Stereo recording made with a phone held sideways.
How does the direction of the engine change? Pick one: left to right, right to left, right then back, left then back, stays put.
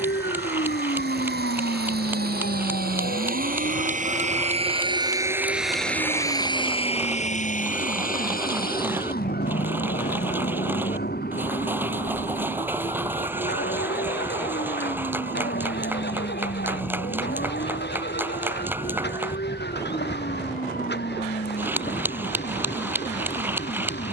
right to left.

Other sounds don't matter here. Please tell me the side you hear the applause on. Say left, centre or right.
centre.